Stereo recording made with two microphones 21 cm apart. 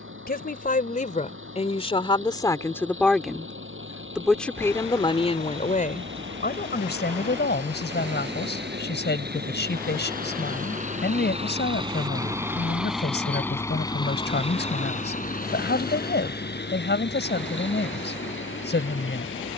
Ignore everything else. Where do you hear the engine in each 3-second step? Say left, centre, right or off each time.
right, right, right, right, centre, left, left.